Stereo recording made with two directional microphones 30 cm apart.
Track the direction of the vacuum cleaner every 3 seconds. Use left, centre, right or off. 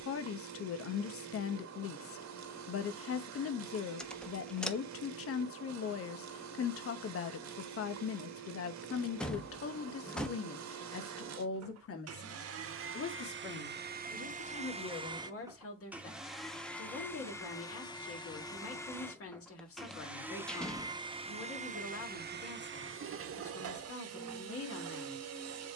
right, right, right, right, right, centre, centre, right, right.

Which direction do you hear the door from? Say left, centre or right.
centre.